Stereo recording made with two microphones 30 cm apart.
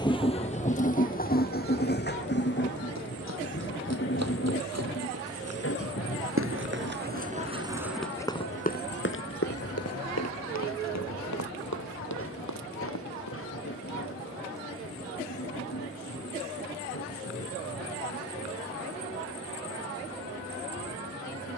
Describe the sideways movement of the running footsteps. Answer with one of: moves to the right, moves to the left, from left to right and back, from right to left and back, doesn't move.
moves to the left.